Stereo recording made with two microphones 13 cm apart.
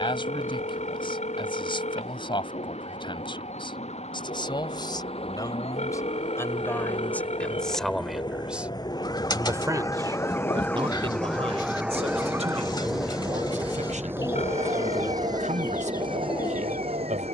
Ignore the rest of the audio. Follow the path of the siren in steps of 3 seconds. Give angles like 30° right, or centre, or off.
70° left, 60° left, 50° left, 10° left, 30° right, 60° right.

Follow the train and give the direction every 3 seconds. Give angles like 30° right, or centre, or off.
50° left, 50° left, 40° left, 20° left, 10° right, 40° right.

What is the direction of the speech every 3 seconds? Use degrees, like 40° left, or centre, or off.
40° left, 30° left, 10° left, 40° right, 60° right, 70° right.